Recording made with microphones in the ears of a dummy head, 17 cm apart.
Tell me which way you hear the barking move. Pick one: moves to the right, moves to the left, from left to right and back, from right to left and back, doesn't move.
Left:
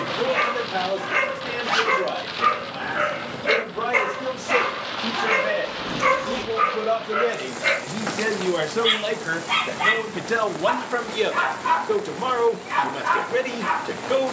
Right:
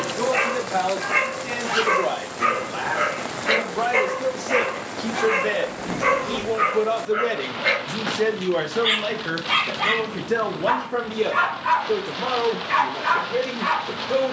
from right to left and back.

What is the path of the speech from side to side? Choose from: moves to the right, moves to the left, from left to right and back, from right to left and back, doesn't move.
moves to the left.